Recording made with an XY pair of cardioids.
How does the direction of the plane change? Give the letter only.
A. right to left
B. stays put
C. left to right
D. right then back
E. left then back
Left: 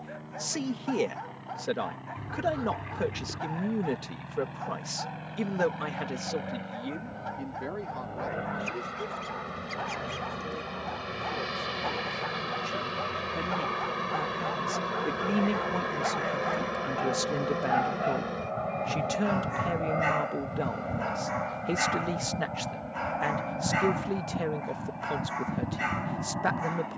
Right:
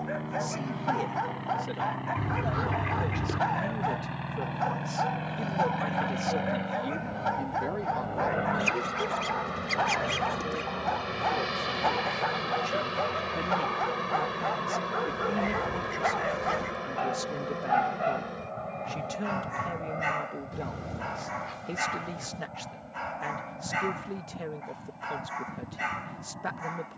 A.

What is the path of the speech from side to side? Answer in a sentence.
In this clip you hear the speech move from left to right and back again.